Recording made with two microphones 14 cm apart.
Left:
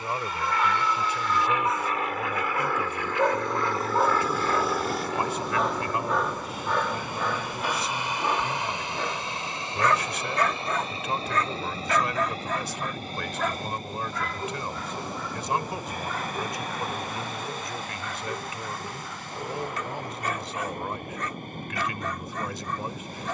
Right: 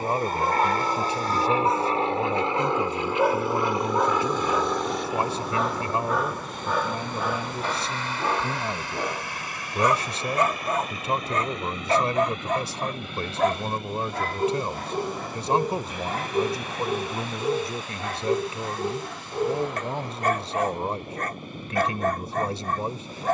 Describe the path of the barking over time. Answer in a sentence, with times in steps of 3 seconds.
You can hear the barking on the right from 0 s, in the centre from 3 s and on the right from 9 s.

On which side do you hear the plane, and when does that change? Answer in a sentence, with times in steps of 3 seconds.
You can hear the plane on the right from 0 s, in the centre from 3 s and on the left from 9 s.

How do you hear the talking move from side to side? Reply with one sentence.
You can hear the talking stay in one place.